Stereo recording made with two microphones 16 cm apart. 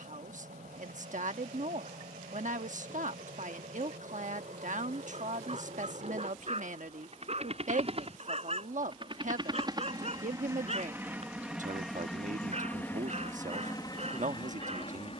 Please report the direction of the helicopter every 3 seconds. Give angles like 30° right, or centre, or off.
70° right, 60° right, 50° right, 20° right, 20° left.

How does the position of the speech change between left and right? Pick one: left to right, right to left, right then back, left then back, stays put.
stays put.